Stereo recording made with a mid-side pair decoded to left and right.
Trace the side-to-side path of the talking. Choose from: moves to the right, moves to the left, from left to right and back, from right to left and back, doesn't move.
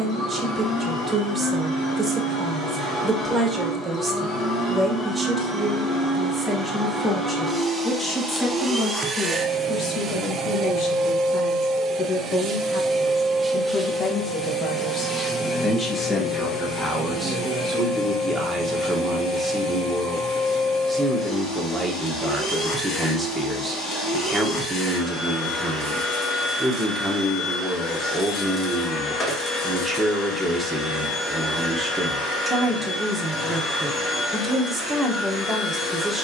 from right to left and back.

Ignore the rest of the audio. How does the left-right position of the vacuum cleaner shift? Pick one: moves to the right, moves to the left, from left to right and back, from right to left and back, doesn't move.
from left to right and back.